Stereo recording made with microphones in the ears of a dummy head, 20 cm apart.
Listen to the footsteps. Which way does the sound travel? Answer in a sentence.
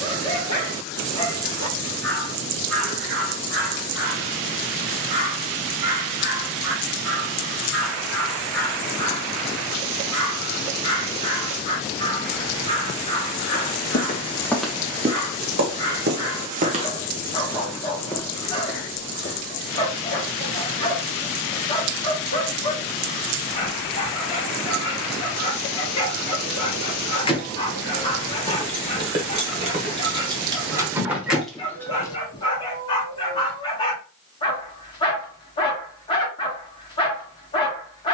You can hear the footsteps go right and come back.